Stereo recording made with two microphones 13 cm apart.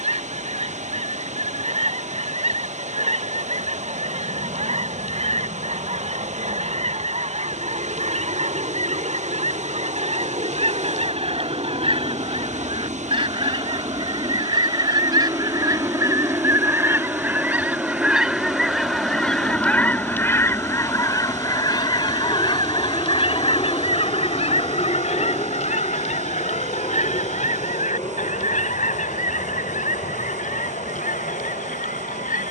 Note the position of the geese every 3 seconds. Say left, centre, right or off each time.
right, right, right, right, right, right, centre, left, left, left, left.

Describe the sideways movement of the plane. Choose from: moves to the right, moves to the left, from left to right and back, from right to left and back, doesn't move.
moves to the left.